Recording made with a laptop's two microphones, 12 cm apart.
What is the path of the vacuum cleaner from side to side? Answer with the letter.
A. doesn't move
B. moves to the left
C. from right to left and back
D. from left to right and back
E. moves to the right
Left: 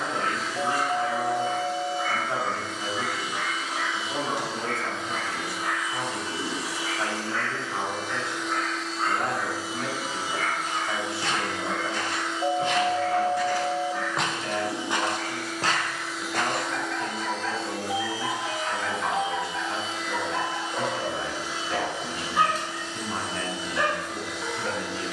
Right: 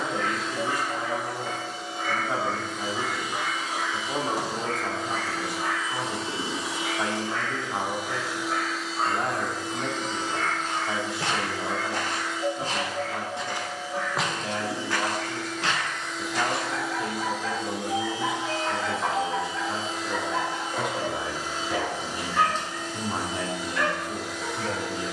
C.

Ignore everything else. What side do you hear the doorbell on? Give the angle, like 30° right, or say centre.
30° left.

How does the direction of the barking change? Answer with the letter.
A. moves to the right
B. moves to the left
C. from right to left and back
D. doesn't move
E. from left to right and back
E.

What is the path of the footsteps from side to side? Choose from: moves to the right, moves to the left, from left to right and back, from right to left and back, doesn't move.
moves to the left.